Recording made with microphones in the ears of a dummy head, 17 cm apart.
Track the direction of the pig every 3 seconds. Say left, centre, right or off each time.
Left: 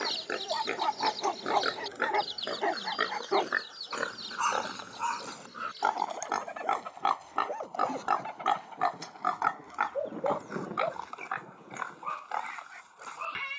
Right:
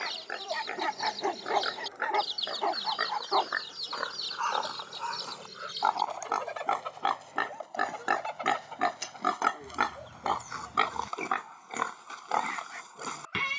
left, left, centre, right, right.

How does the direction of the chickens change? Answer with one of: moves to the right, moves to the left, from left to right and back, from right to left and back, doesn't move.
moves to the right.